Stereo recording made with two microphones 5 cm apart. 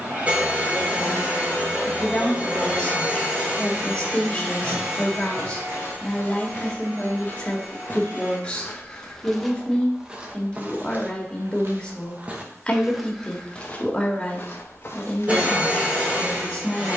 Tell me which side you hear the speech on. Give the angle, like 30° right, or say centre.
20° left.